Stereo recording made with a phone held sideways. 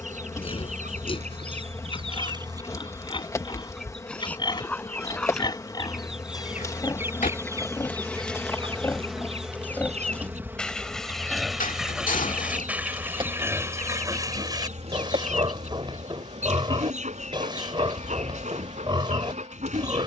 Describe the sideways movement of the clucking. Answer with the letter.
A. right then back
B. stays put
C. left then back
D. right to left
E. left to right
C.